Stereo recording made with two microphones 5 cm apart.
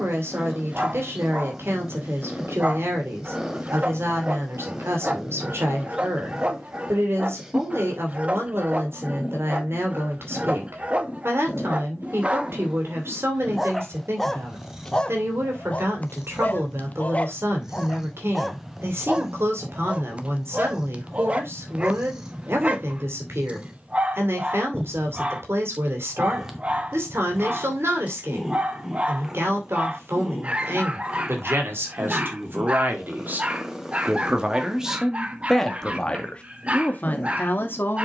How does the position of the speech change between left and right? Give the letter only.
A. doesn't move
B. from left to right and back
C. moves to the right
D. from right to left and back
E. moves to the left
E.